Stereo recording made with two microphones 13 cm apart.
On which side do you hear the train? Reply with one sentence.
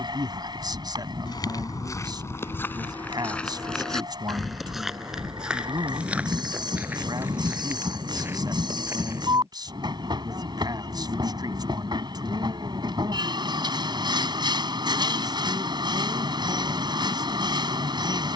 In this clip you hear the train on the right.